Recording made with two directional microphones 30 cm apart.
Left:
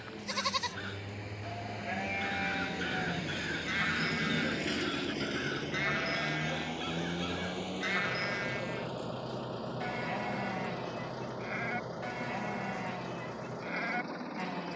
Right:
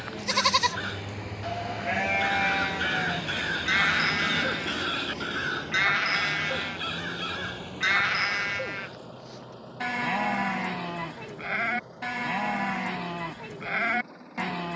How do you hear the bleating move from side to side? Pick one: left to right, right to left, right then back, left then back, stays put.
stays put.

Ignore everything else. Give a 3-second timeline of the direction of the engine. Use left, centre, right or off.
right, centre, left, left, left.